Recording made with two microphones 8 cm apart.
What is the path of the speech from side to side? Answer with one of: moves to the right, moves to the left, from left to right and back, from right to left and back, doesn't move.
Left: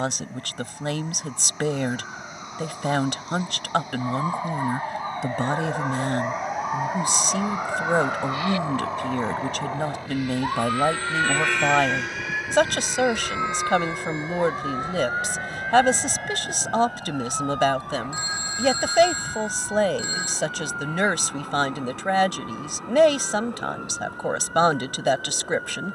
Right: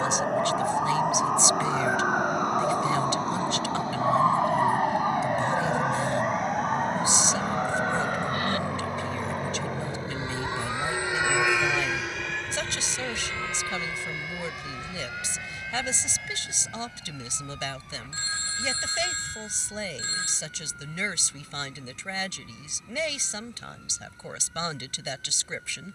doesn't move.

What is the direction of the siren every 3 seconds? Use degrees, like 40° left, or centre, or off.
60° right, 20° right, 10° left, 30° left, 40° left, 50° left, 50° left, 60° left, 60° left.